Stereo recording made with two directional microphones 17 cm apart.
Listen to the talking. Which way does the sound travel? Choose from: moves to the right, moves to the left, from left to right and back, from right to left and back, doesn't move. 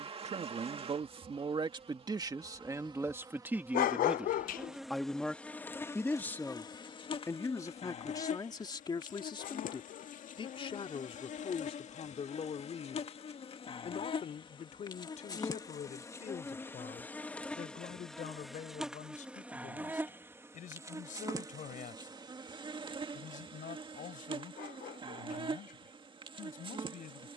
moves to the left.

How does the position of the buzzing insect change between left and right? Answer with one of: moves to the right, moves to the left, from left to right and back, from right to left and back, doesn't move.
from right to left and back.